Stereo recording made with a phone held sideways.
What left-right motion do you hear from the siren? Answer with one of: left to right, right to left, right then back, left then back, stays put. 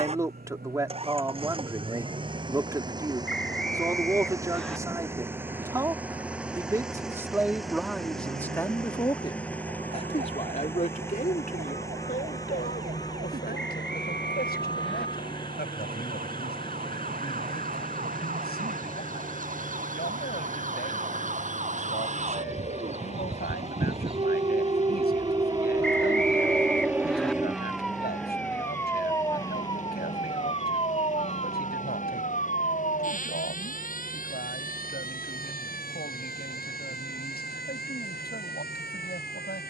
right to left.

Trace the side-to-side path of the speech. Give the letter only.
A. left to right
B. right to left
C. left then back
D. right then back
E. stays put
B.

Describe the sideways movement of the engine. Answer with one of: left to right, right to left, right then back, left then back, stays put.
right to left.